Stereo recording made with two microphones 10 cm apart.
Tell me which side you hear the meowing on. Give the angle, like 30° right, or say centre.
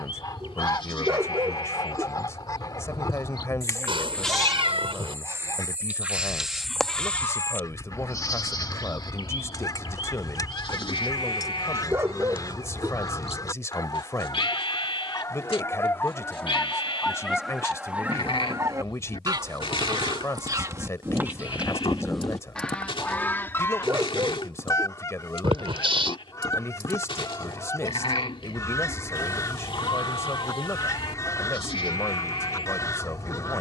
70° right.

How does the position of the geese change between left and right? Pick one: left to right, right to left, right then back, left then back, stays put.
right then back.